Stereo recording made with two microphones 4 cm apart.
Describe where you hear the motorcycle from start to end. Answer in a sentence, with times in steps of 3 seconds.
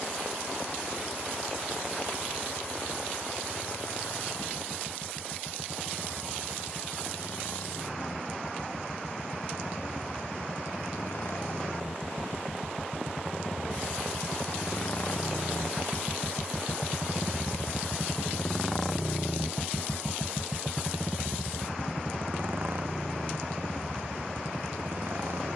You can hear the motorcycle on the left from 0 s, in the centre from 18 s and on the right from 21 s.